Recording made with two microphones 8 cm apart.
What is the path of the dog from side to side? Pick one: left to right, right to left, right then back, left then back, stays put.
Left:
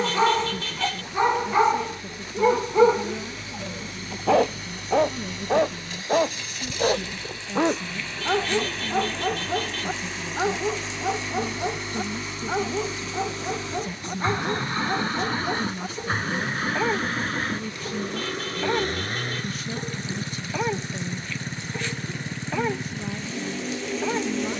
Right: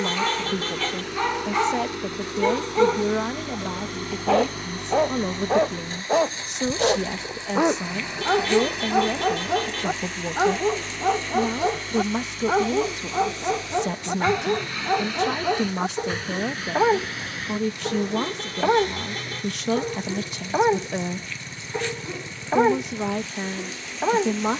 left to right.